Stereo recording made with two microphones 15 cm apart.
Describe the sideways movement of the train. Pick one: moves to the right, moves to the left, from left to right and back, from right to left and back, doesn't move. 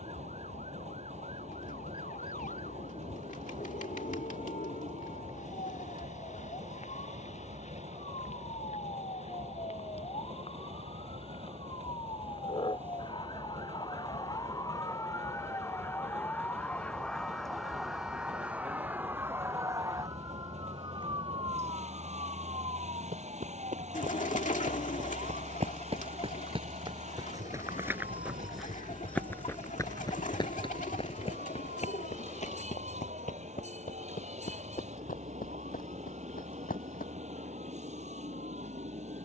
doesn't move.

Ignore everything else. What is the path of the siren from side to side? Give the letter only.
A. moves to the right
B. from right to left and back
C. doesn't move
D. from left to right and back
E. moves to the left
A.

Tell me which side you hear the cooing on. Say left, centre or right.
left.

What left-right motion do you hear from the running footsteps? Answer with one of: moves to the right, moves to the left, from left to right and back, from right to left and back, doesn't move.
moves to the left.